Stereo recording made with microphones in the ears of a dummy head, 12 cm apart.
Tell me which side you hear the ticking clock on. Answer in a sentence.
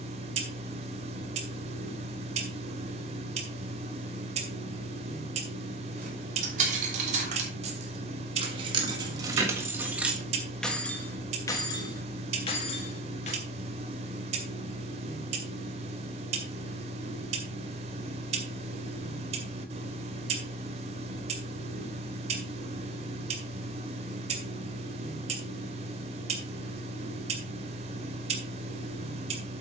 You can hear the ticking clock on the right.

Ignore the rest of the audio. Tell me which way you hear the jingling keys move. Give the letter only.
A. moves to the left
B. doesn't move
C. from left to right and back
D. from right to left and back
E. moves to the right
A.